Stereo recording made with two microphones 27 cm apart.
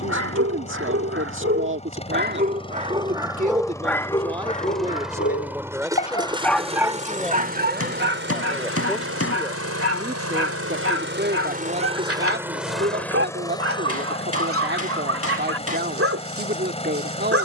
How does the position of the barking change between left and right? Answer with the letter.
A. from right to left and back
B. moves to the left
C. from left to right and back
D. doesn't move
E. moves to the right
A.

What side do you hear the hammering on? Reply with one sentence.
In this clip you hear the hammering on the left.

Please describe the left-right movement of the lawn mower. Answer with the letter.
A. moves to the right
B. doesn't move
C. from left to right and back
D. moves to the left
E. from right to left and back
C.